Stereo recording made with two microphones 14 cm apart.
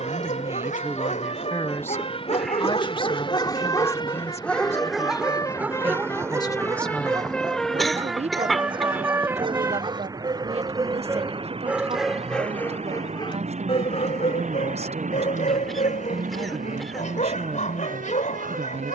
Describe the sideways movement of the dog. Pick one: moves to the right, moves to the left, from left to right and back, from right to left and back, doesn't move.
from left to right and back.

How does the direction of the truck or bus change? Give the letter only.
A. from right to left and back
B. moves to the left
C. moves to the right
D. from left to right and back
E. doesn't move
C.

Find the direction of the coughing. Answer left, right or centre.
centre.